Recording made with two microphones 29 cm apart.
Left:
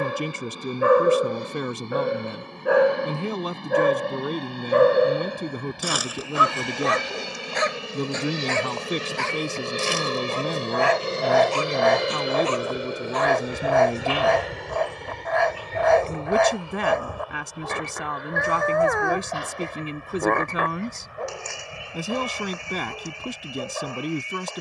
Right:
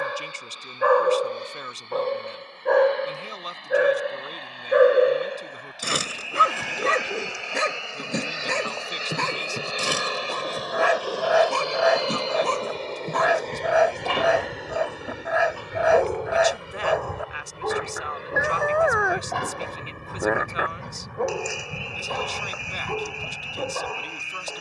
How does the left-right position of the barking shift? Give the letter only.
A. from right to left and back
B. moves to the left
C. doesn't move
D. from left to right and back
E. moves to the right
E.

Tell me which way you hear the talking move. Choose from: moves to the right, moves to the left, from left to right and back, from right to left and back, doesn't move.
doesn't move.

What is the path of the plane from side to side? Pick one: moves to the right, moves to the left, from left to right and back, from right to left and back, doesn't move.
moves to the right.